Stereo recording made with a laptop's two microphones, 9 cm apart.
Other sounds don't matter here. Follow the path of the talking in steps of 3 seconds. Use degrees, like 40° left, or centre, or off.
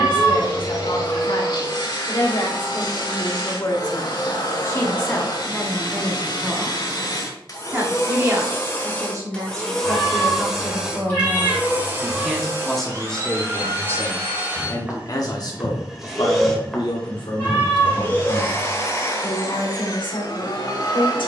60° left, 30° left, 20° right, 30° right, 10° left, 50° left, 60° left.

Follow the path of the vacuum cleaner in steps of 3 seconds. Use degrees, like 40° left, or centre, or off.
50° left, 50° left, 40° left, centre, 30° right, centre, 40° left.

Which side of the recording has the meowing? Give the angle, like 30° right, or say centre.
20° left.